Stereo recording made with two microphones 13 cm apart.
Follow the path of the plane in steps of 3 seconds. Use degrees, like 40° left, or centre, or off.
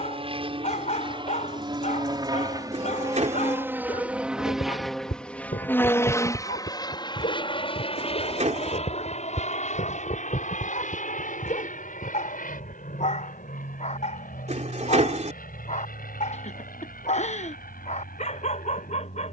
40° right, centre, 40° left, 60° left, 70° left, 80° left, 80° left.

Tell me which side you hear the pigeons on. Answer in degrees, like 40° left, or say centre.
60° right.